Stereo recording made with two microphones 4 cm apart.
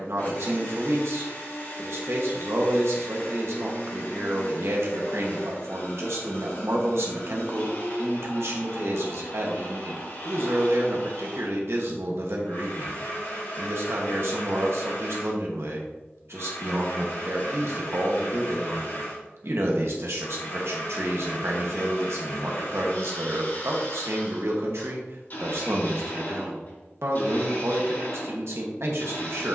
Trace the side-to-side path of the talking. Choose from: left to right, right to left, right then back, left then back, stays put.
stays put.